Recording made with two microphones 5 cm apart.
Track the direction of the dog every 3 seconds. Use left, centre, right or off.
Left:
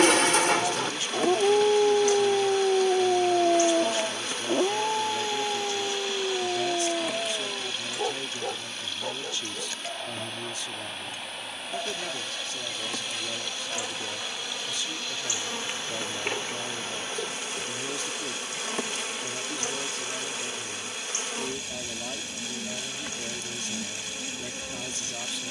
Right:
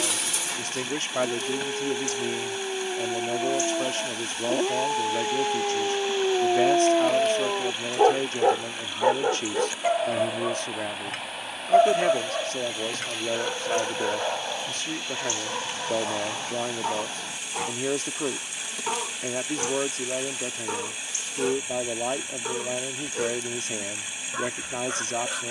left, centre, right, right, right, right, right, right, right.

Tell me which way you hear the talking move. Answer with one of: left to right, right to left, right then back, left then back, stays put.
stays put.